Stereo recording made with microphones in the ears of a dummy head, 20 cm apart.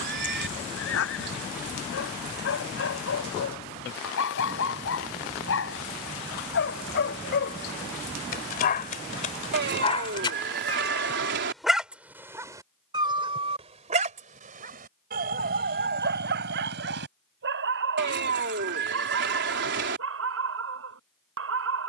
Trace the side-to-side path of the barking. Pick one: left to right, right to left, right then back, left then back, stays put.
left to right.